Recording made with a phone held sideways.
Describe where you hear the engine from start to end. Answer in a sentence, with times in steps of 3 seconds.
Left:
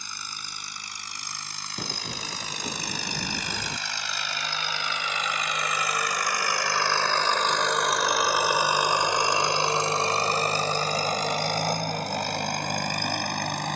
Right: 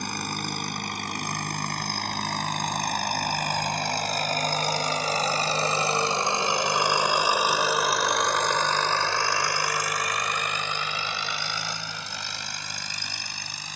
In this clip you hear the engine on the right from 0 s, in the centre from 6 s and on the left from 9 s.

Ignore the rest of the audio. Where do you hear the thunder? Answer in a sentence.
In this clip you hear the thunder on the left.